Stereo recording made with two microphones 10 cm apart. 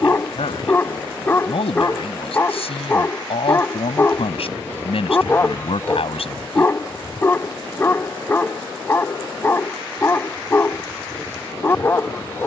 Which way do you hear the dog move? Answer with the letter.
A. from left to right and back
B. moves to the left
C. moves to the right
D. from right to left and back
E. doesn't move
E.